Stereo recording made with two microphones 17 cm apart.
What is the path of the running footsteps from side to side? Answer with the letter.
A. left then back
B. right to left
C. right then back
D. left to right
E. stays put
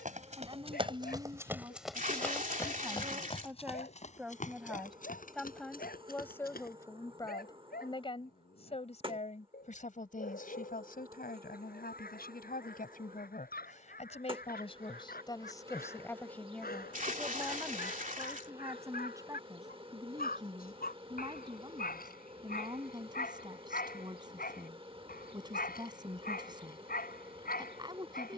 B.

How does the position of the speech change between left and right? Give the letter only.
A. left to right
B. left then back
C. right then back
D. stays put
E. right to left
B.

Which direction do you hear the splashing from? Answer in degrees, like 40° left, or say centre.
50° right.